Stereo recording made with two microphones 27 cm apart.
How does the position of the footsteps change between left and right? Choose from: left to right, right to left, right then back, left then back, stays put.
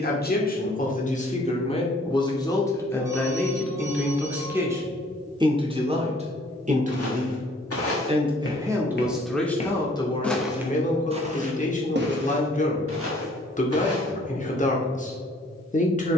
left to right.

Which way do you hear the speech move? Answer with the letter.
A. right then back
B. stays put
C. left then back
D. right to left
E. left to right
A.